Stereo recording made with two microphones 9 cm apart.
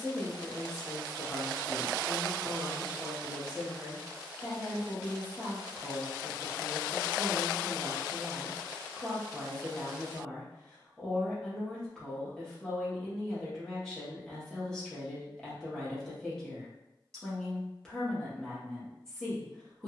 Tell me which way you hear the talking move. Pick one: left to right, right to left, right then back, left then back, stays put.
stays put.